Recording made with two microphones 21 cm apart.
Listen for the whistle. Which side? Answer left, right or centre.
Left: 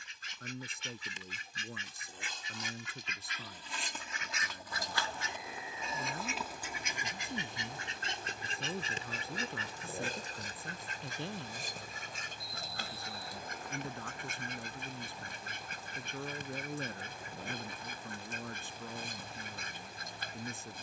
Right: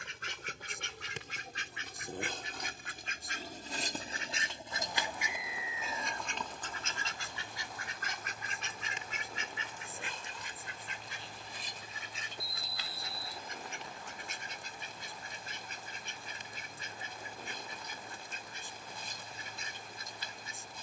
right.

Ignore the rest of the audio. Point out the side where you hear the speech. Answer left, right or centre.
left.